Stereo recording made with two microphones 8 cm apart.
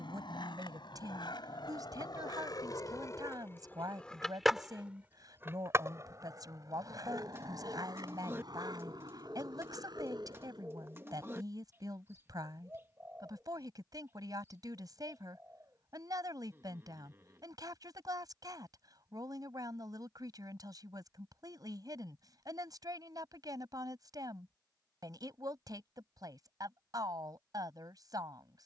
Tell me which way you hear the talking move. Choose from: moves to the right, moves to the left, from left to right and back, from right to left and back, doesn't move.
doesn't move.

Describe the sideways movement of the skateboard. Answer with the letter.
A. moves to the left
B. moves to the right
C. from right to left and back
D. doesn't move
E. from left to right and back
B.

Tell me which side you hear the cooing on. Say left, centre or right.
right.